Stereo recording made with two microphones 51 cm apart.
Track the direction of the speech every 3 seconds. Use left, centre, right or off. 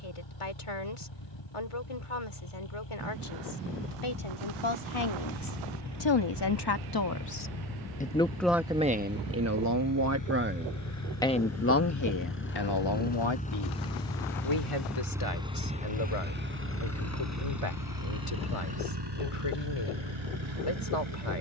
left, left, left, centre, left, left, left.